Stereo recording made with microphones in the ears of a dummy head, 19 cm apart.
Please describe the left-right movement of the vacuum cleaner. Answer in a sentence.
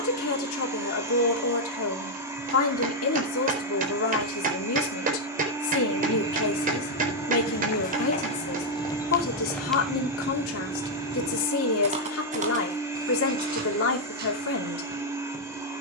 In this clip you hear the vacuum cleaner stay in one place.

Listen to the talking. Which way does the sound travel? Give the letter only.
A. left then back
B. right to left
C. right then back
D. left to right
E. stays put
E.